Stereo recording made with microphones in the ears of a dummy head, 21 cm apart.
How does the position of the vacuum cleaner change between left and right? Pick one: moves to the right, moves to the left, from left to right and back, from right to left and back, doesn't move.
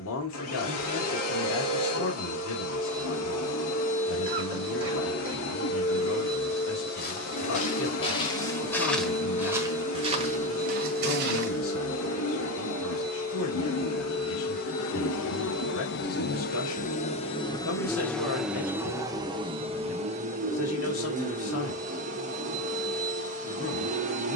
moves to the right.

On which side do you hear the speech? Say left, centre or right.
left.